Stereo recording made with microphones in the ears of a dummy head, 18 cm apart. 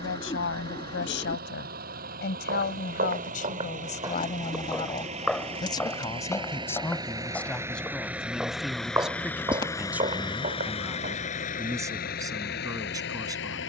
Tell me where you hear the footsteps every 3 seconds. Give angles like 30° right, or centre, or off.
50° right, 20° right, centre, 30° right, off.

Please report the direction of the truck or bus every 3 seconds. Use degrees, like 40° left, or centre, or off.
50° right, 40° right, 10° right, 30° left, 50° left.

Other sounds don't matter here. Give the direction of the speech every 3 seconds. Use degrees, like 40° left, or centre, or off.
60° left, 30° left, 10° left, 10° right, 20° right.